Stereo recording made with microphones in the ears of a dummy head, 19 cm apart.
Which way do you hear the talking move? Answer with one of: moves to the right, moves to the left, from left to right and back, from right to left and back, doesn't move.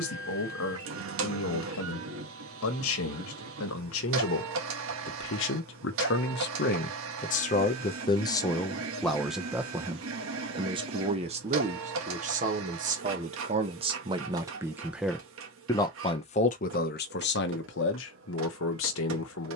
from left to right and back.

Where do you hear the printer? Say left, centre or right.
right.